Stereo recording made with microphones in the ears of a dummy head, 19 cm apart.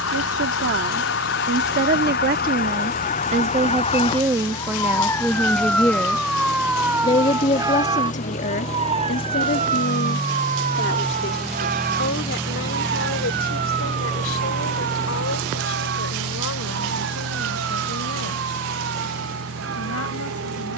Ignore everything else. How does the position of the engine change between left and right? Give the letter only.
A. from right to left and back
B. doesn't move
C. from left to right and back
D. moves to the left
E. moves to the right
E.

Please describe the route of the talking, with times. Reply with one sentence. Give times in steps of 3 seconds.
In this clip you hear the talking on the right from 0 s, in the centre from 3 s and on the left from 6 s.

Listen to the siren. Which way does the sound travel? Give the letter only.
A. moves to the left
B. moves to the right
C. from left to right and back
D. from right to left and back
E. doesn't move
B.